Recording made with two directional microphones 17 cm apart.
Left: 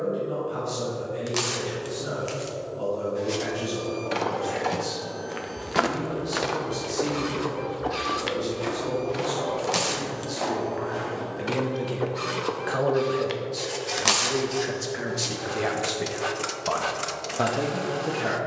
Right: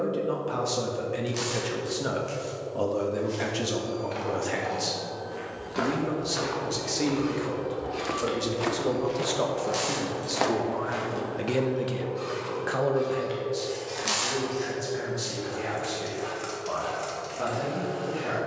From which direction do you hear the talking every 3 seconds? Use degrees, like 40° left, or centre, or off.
60° right, 60° right, 50° right, 30° right, 20° left, 50° left.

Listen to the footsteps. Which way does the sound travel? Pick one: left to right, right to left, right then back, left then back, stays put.
left to right.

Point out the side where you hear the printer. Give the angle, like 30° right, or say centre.
50° left.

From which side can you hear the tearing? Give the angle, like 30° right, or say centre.
50° left.